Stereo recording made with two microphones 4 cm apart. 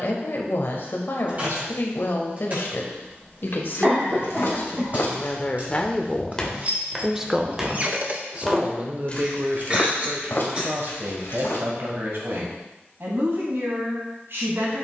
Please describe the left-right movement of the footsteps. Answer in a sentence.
You can hear the footsteps go right and come back.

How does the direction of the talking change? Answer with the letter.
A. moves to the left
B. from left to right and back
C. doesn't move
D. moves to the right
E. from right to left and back
D.